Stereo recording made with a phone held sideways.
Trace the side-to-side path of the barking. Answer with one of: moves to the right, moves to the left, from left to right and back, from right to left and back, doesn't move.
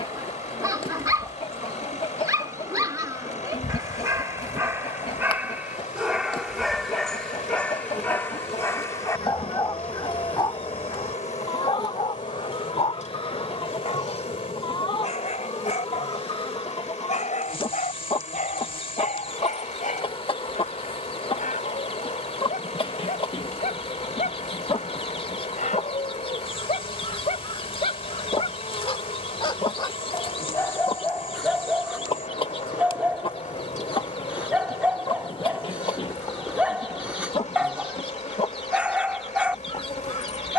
from right to left and back.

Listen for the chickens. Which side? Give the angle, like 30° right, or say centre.
40° left.